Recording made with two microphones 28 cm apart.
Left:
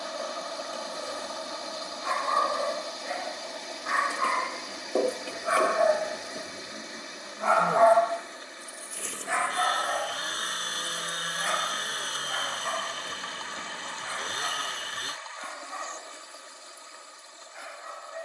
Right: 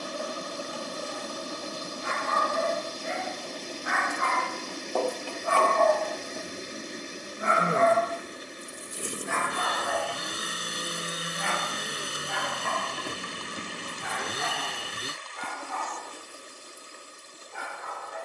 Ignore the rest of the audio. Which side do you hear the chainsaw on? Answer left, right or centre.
right.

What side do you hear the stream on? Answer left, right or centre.
right.